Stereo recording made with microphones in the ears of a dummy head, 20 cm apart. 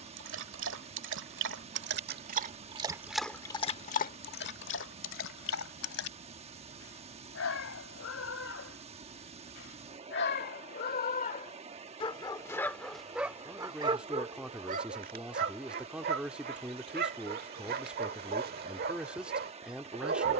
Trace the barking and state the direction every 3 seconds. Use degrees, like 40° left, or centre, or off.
50° right, 40° left, 70° left, 40° left, 10° right, 40° right, 40° right.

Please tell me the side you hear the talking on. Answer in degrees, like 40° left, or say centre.
10° right.